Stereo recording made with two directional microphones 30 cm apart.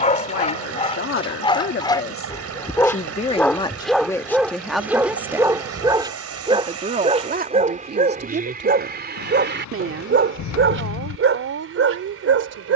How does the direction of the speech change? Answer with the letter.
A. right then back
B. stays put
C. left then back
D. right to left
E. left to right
E.